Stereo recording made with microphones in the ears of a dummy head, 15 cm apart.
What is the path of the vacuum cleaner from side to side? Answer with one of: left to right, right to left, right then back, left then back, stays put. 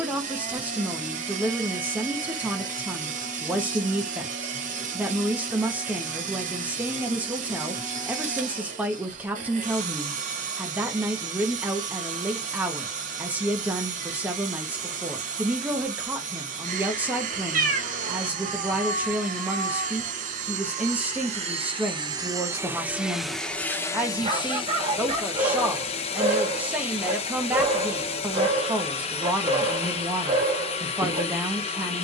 right to left.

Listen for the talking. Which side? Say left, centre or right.
centre.